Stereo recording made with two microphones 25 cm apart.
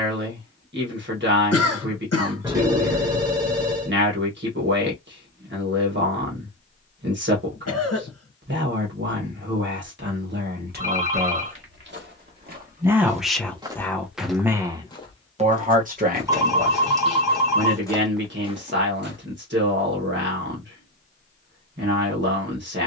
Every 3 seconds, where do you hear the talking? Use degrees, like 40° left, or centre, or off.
50° right, 50° right, 50° right, 40° right, 10° right, 40° right, 40° right, 40° right.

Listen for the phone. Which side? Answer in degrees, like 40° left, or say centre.
10° right.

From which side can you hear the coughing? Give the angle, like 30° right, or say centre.
70° left.